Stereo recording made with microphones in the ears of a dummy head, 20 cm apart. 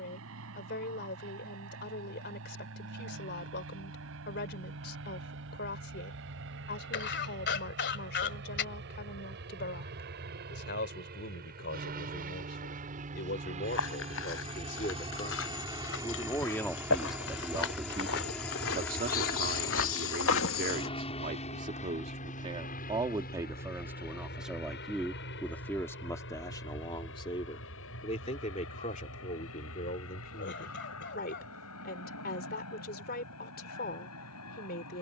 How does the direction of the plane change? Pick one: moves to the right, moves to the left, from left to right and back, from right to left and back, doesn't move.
moves to the left.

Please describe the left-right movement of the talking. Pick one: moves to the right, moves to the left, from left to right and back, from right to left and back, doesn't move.
from left to right and back.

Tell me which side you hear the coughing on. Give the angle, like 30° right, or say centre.
50° left.